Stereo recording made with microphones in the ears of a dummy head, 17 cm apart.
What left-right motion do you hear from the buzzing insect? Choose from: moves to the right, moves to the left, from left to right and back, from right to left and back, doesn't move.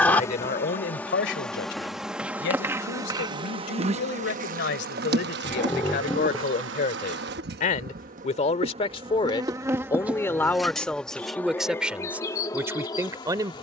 from left to right and back.